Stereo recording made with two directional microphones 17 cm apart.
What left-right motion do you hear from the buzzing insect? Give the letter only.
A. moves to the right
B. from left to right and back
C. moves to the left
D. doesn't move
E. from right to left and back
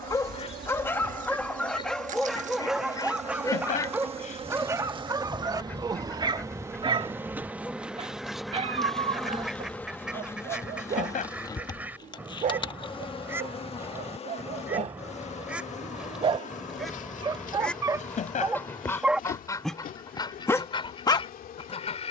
C.